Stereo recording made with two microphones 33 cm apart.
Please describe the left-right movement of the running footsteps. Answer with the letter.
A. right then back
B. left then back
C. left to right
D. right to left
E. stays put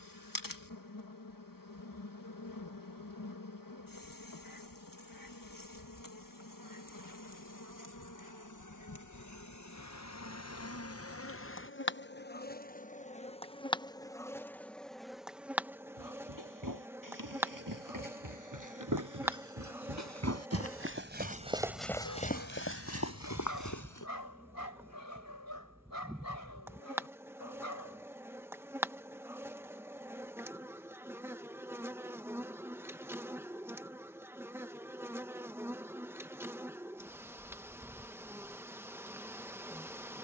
D.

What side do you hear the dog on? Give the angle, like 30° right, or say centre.
80° left.